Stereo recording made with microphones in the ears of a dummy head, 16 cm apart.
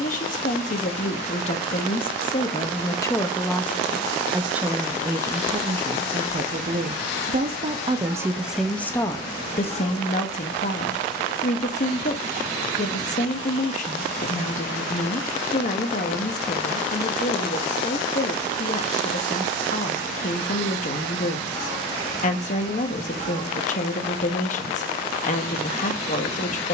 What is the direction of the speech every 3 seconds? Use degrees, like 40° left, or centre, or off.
40° left, 10° right, 20° right, 40° left, 40° left, 40° left, 40° left, 40° left, 40° left.